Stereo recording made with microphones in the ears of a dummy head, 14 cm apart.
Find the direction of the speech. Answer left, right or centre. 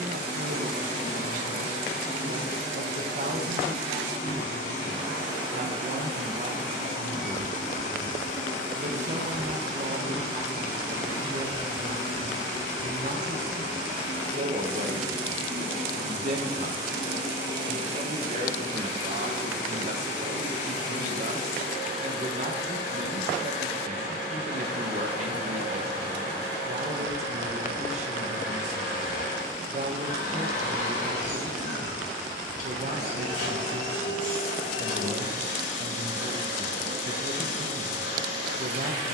right.